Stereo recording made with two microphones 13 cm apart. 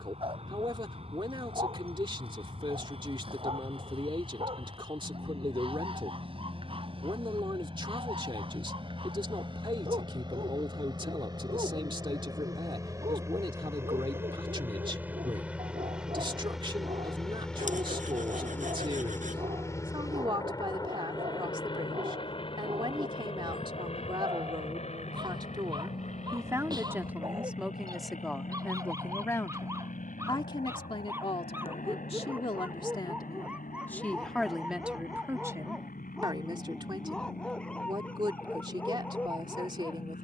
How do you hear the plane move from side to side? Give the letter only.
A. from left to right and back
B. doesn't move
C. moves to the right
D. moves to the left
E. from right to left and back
D.